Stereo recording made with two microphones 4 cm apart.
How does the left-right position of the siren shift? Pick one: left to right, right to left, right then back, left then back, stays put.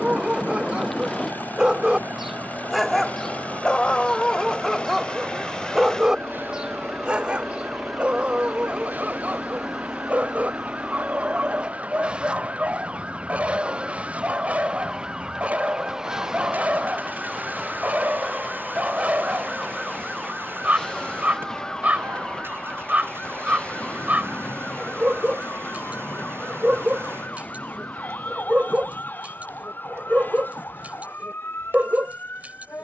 right to left.